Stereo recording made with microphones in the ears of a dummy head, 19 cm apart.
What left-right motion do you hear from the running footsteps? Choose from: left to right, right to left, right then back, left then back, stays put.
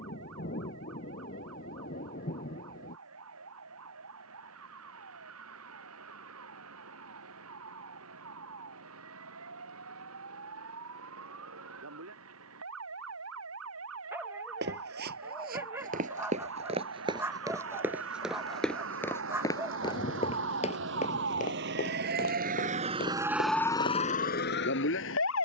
right to left.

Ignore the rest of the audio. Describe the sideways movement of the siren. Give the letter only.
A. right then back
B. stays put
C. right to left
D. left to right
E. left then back
C.